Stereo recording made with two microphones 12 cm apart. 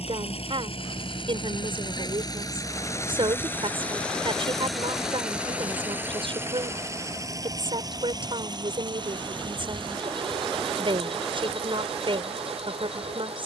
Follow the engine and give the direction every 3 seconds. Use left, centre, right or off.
left, centre, right, right, right.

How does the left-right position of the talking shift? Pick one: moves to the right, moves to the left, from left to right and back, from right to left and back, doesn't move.
doesn't move.